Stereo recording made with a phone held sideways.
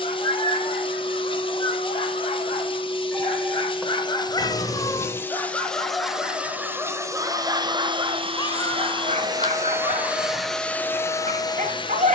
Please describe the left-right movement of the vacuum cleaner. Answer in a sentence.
You can hear the vacuum cleaner go right and come back.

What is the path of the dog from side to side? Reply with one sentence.
In this clip you hear the dog travel towards the right.